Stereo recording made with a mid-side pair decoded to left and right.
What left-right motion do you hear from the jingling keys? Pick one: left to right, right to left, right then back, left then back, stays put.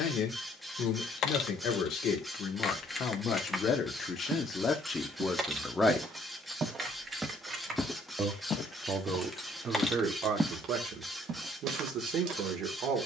right then back.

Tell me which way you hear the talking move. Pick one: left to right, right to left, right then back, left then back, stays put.
left to right.